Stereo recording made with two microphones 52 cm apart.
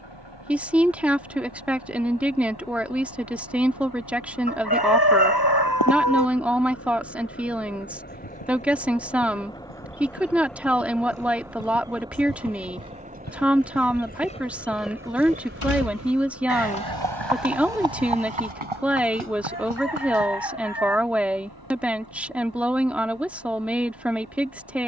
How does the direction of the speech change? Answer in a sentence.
You can hear the speech stay put.